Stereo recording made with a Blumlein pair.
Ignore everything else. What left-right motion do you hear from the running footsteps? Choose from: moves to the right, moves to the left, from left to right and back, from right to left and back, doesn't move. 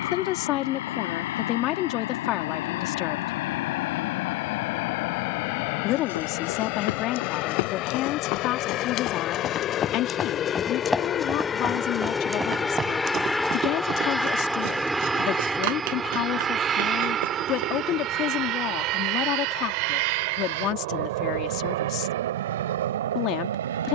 moves to the right.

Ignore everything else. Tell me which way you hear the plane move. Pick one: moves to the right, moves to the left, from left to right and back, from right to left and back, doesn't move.
moves to the right.